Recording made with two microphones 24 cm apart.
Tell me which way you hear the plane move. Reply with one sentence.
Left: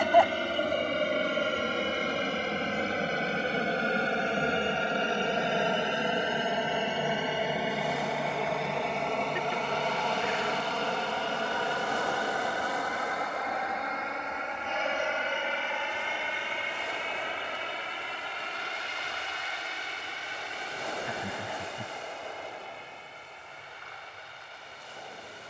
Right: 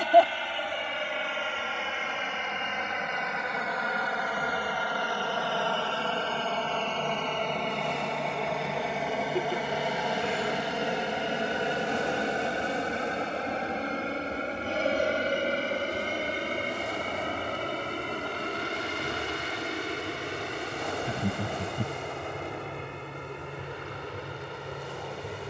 In this clip you hear the plane move from left to right.